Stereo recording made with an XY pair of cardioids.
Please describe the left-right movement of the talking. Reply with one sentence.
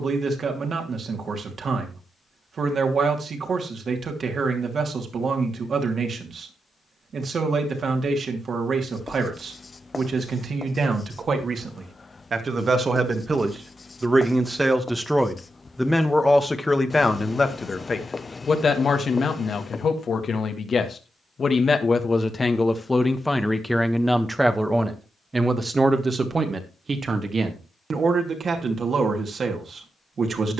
In this clip you hear the talking move from right to left and back again.